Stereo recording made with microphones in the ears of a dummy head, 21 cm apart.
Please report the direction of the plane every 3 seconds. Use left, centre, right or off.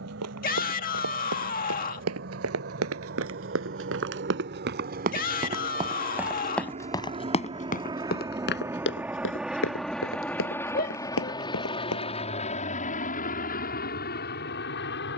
right, right, right, centre, left.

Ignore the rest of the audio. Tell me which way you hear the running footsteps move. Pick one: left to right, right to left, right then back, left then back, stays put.
right to left.